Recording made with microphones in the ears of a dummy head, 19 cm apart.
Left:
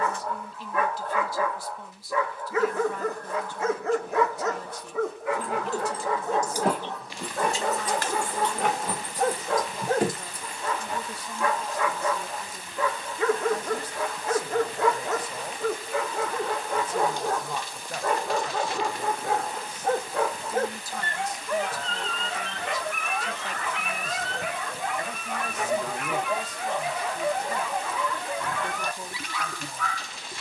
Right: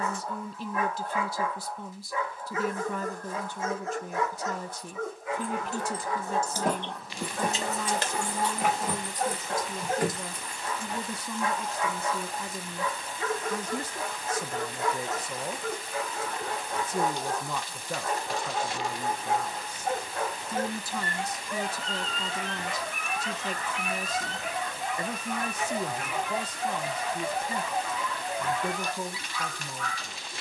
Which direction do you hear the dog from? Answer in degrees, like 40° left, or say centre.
50° left.